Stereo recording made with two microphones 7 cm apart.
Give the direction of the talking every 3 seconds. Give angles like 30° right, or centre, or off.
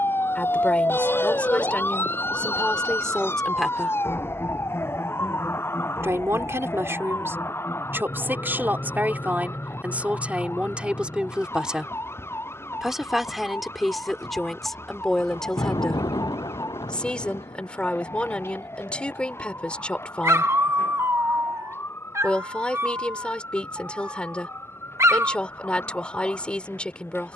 20° left, centre, 30° right, 20° right, centre, 10° left, 20° left, 20° left, 20° left.